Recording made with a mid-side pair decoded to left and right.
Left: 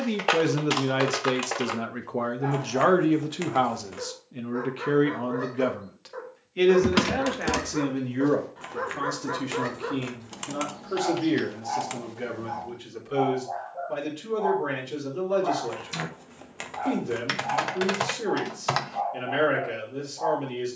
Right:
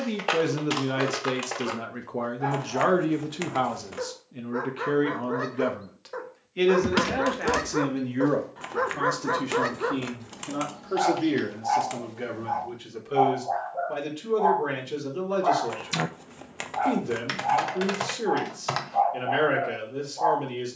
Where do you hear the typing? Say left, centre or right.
left.